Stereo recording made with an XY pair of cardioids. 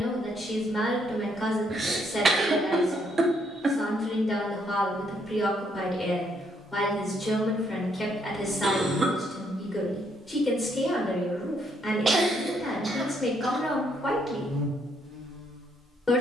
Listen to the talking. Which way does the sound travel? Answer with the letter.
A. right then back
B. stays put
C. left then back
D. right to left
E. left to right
B.